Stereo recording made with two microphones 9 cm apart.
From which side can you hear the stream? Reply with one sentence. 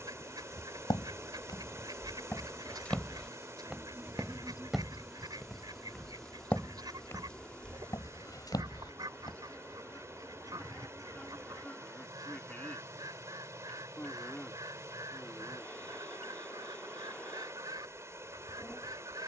You can hear the stream on the right.